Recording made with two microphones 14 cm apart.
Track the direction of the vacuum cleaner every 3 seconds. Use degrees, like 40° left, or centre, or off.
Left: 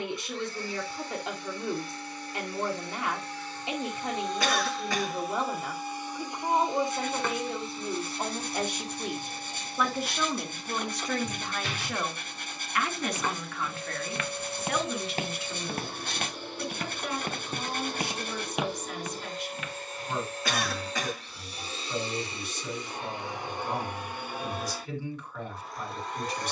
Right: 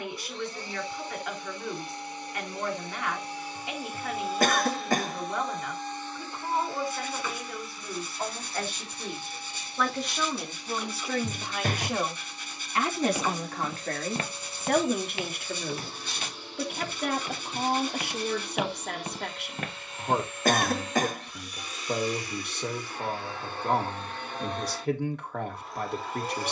20° right, centre, 30° left, 50° left, 60° left, 60° left, 40° left, 20° left, centre.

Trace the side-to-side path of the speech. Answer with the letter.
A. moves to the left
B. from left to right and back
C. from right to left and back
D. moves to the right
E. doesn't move
D.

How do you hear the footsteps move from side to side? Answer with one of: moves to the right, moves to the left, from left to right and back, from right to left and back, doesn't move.
from right to left and back.